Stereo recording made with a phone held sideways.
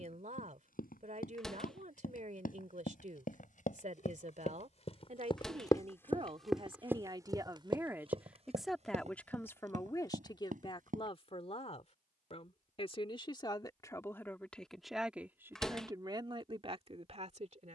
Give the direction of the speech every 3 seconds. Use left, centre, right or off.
right, right, right, left, left, right.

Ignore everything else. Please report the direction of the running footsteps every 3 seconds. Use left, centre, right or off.
left, left, right, right, off, off.